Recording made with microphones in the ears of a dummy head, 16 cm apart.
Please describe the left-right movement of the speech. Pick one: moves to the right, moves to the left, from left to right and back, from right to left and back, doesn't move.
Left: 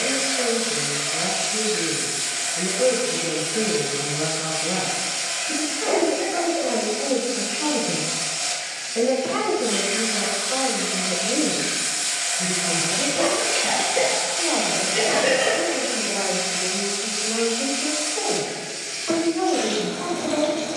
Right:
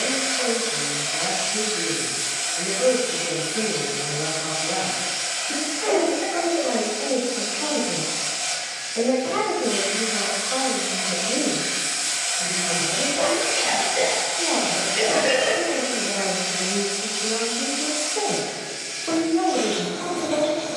moves to the right.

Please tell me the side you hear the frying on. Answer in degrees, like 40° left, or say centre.
60° left.